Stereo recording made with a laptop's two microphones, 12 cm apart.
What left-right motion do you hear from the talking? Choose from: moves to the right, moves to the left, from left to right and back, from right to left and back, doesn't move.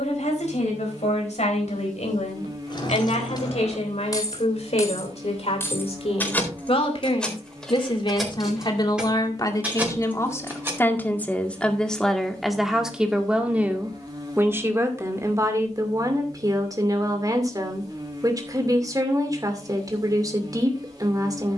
moves to the right.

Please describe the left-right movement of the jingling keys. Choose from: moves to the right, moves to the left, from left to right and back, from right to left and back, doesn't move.
moves to the right.